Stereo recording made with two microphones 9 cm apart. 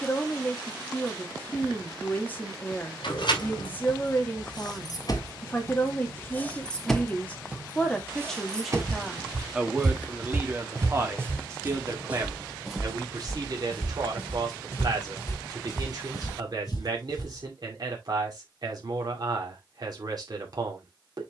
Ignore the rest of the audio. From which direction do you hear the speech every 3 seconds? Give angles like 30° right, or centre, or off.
20° left, 20° left, 10° left, 20° right, 50° right, 50° right, 50° right.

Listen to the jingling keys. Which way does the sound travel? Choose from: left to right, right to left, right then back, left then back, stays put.
left to right.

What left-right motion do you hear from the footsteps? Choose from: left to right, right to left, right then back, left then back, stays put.
right to left.